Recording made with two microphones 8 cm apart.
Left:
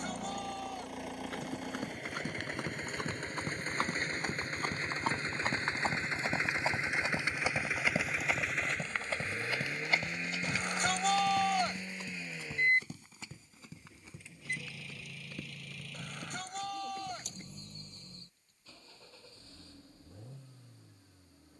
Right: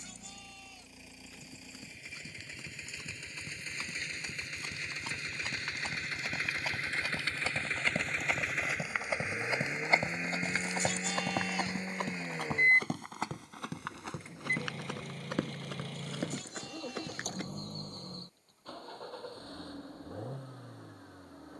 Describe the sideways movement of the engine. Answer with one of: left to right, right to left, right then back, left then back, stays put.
left to right.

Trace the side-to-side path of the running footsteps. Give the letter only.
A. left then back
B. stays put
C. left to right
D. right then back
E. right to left
C.